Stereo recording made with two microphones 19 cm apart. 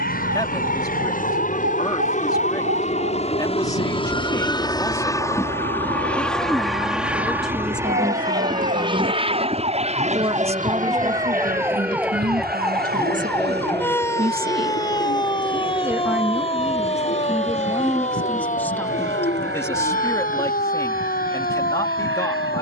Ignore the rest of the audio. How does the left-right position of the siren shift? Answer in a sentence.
In this clip you hear the siren move to the left.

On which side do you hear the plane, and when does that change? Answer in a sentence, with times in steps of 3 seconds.
You can hear the plane on the left from 0 s, in the centre from 6 s and on the right from 9 s.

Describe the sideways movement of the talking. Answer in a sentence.
You can hear the talking go right and come back.